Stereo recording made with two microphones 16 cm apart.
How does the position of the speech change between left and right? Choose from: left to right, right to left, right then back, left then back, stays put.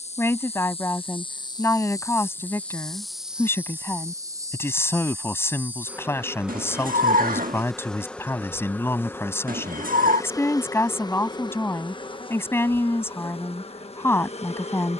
stays put.